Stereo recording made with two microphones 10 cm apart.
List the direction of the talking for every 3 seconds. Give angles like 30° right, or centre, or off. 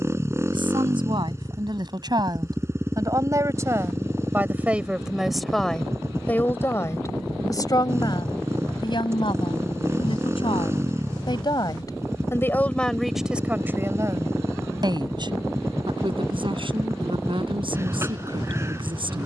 50° right, 20° right, 30° left, 50° left, 10° right, 60° right, 60° right.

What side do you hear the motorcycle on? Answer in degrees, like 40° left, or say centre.
30° right.